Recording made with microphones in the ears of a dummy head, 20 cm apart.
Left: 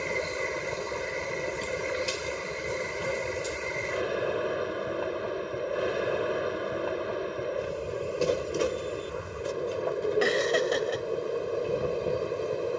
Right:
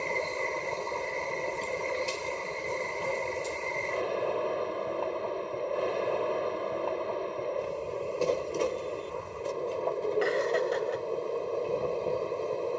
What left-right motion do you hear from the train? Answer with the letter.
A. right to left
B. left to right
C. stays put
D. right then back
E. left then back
C.